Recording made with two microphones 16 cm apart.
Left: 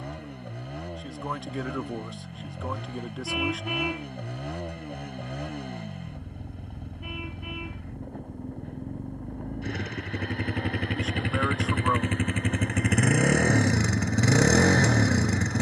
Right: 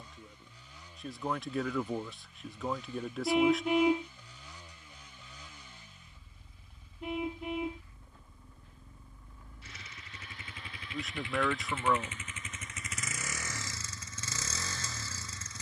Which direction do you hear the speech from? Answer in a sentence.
In this clip you hear the speech in the centre.